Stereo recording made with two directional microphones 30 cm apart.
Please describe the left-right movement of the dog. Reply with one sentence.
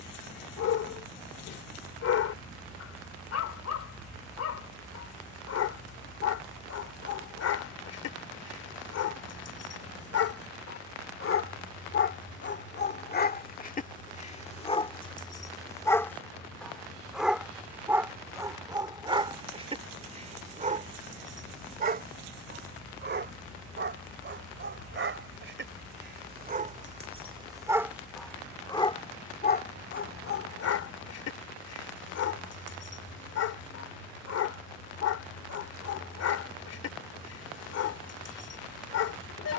In this clip you hear the dog move from left to right and back again.